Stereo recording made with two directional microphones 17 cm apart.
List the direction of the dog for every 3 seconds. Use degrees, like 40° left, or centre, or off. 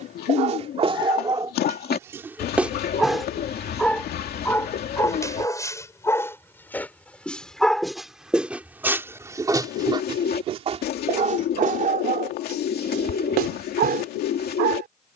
30° right, 10° left, centre, 40° right, 60° right.